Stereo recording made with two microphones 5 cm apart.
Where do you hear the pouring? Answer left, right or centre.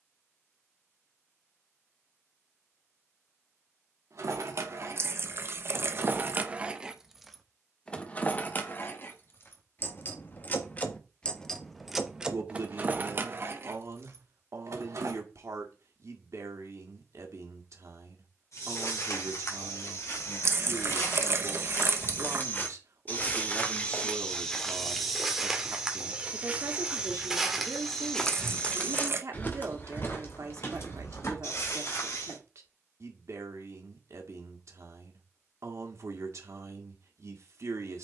right.